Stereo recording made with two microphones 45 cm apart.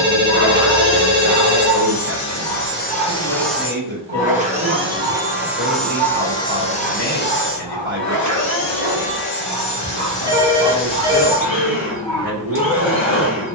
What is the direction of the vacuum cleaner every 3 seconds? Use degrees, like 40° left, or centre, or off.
50° left, centre, 30° left, 60° left, 70° left.